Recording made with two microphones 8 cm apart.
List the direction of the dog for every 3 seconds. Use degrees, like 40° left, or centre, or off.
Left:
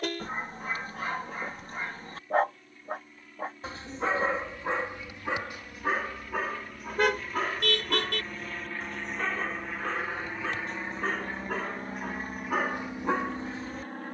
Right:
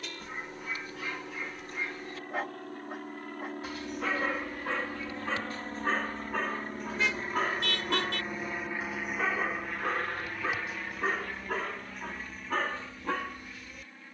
40° left, 20° left, centre, 10° right, 20° left.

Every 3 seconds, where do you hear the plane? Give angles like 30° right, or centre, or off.
70° right, 60° right, 30° right, 10° left, 40° left.